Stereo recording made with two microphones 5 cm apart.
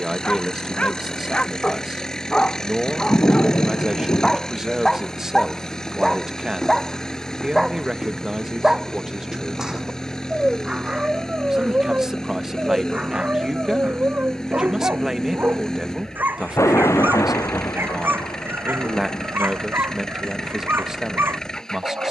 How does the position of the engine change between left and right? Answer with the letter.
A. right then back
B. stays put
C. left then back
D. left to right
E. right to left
B.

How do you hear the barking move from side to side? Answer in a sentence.
In this clip you hear the barking travel towards the right.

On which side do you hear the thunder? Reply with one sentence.
In this clip you hear the thunder on the left.